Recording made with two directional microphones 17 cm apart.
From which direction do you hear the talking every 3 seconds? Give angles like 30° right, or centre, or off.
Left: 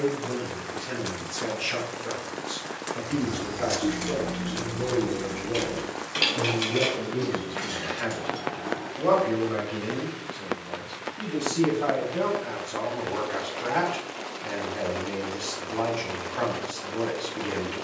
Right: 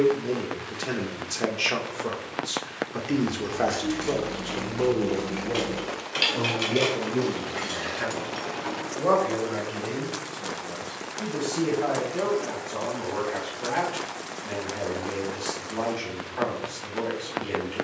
60° right, 50° right, 10° right, 10° left, 10° left, 10° left.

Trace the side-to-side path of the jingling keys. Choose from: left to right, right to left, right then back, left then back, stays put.
left to right.